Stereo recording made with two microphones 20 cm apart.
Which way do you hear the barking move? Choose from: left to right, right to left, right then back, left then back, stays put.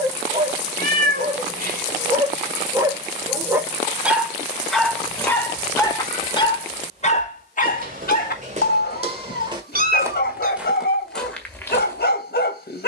right to left.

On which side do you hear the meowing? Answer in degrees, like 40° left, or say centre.
50° right.